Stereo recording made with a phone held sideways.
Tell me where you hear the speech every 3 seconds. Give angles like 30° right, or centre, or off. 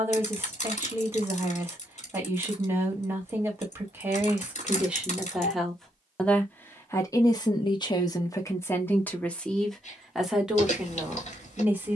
20° right, 10° right, 20° left, centre.